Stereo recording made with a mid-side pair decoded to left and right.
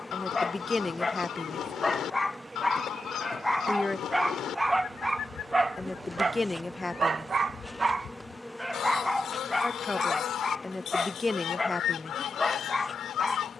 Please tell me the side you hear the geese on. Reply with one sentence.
You can hear the geese on the left.